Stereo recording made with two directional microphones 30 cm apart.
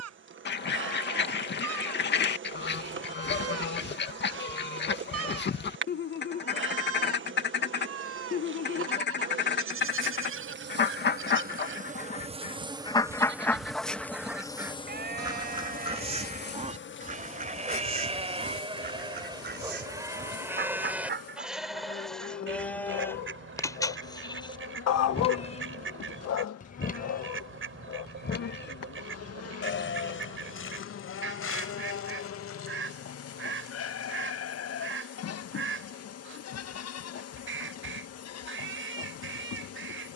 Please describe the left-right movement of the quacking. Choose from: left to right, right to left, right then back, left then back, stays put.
left to right.